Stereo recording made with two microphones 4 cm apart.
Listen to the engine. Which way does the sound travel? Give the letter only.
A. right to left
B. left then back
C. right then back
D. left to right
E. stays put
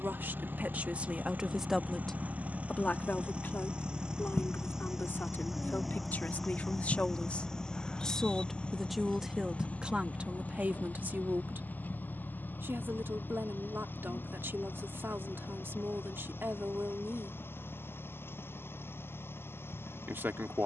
A.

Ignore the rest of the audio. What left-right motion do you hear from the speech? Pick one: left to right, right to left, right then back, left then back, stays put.
left then back.